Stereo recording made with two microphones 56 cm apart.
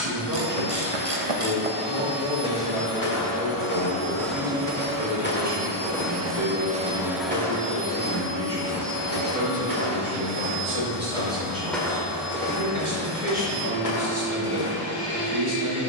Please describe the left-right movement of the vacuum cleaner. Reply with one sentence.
In this clip you hear the vacuum cleaner move from left to right and back again.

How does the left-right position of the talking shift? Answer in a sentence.
You can hear the talking go right and come back.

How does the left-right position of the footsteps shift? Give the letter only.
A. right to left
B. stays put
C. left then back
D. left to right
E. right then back
E.